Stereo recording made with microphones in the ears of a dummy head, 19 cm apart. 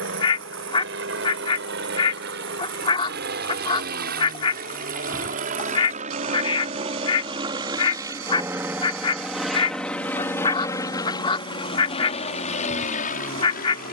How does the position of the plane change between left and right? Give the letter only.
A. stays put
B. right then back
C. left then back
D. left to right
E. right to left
E.